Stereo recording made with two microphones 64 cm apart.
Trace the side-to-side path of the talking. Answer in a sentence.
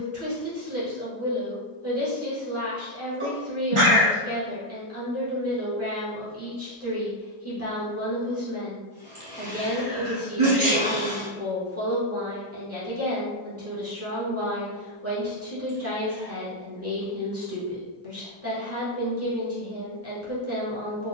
In this clip you hear the talking stay in one place.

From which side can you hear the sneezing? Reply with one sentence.
You can hear the sneezing on the right.